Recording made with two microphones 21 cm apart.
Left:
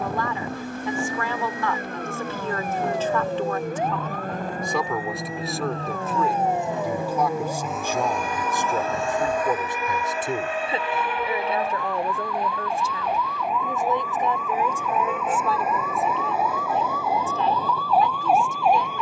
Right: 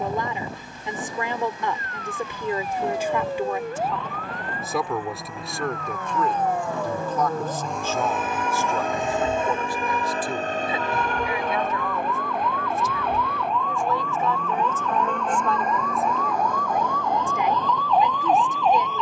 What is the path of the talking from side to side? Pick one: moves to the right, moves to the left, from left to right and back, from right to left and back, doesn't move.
from right to left and back.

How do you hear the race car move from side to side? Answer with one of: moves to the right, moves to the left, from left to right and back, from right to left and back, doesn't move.
moves to the right.